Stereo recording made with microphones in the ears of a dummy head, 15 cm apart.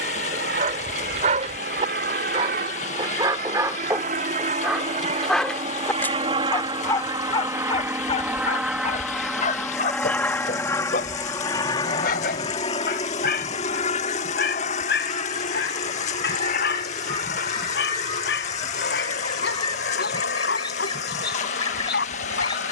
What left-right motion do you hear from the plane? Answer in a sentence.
You can hear the plane travel towards the left.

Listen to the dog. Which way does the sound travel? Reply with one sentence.
You can hear the dog travel towards the left.